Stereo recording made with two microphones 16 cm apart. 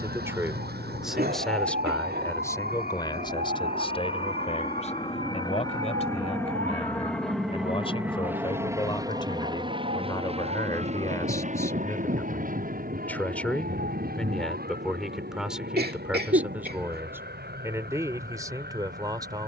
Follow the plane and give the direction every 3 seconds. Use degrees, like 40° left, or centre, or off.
50° left, 30° left, centre, 40° right, 60° right, 70° right, 70° right.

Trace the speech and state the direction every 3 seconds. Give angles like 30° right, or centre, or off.
centre, 40° left, 40° left, 20° left, 10° left, 10° right, 20° right.